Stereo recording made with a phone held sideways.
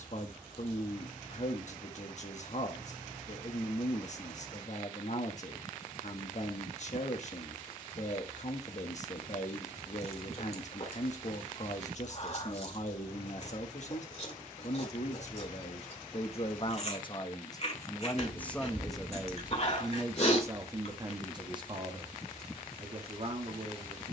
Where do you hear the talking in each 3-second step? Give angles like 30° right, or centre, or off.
50° left, 50° left, 50° left, 50° left, 50° left, 40° left, 10° right, 40° right.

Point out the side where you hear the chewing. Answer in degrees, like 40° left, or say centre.
50° left.